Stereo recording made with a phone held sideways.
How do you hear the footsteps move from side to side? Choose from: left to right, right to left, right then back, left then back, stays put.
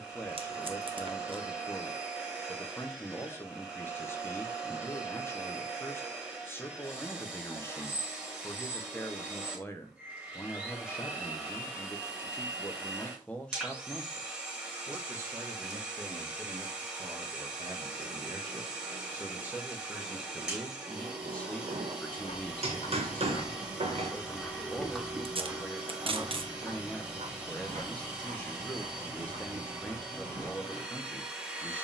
left to right.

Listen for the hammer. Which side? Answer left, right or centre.
right.